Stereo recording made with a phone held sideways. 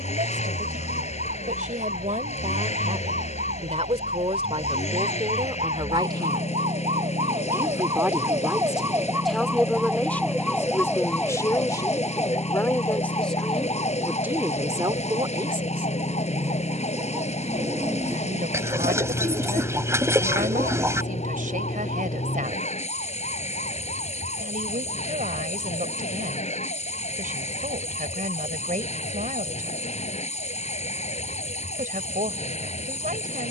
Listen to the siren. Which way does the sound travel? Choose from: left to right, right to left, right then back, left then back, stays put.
right to left.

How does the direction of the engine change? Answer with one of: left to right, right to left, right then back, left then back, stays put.
stays put.